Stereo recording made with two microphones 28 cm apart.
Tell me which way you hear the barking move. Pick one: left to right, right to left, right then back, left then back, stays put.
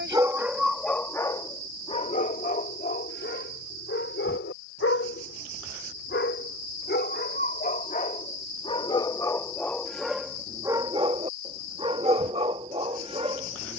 left then back.